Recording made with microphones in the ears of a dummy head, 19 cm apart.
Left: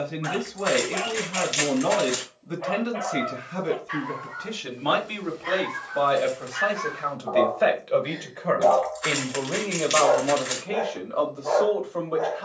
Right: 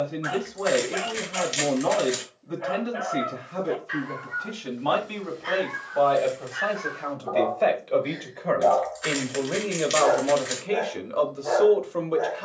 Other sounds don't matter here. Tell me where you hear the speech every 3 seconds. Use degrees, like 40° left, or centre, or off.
30° left, 30° left, 10° left, 20° right.